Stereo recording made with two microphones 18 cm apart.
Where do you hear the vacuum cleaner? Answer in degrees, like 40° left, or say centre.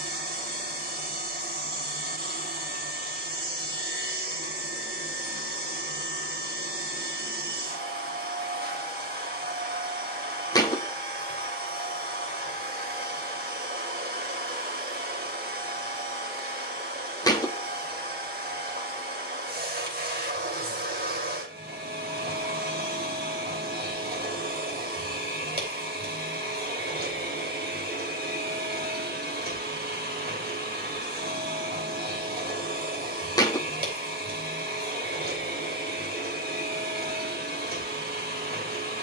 60° right.